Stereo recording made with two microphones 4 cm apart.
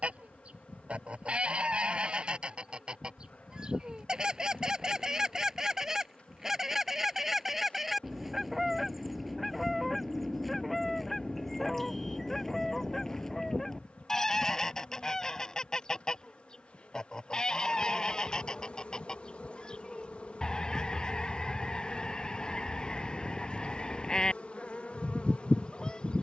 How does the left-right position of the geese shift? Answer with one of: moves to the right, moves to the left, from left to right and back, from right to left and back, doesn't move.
moves to the left.